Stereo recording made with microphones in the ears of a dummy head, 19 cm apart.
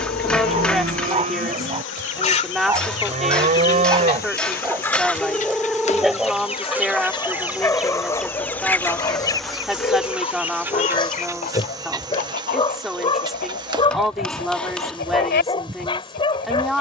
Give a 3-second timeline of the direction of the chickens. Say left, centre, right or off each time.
left, centre, centre, left, left, left.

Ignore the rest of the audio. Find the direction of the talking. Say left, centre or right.
centre.